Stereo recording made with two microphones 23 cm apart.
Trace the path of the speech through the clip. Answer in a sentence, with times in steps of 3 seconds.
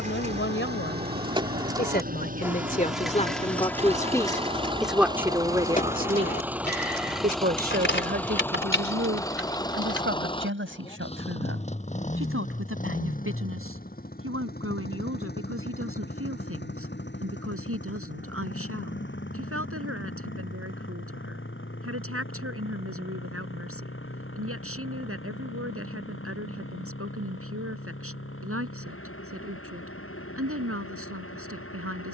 In this clip you hear the speech on the left from 0 s, in the centre from 3 s and on the right from 6 s.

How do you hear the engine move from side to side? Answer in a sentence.
In this clip you hear the engine move to the left.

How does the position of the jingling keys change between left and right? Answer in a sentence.
You can hear the jingling keys move from right to left.